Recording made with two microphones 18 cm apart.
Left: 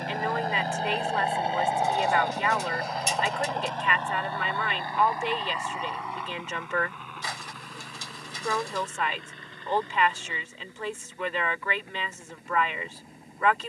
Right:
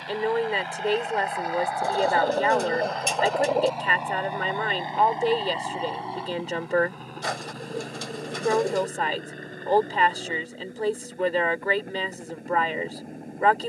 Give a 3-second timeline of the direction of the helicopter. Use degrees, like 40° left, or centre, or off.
30° left, 20° right, 40° right, 50° right, 50° right.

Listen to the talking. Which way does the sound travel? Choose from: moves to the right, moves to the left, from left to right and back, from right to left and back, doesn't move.
doesn't move.